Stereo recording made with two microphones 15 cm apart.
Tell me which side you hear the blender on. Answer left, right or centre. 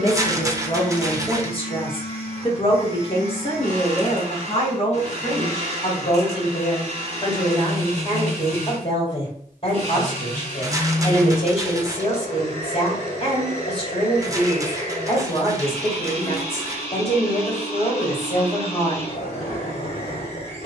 left.